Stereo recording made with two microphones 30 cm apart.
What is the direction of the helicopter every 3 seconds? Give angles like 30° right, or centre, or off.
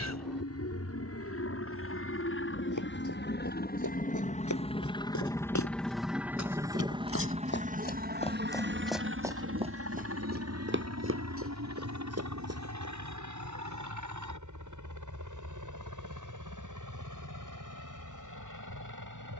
50° left, 20° left, 20° right, 50° right, 60° right, 70° right, 80° right.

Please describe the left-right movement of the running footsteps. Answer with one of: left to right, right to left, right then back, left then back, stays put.
left to right.